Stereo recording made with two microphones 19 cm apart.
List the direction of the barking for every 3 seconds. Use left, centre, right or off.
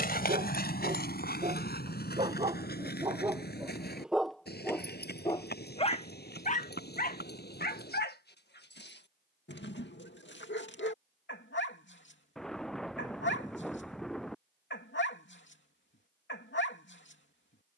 right, centre, left, left, left, left.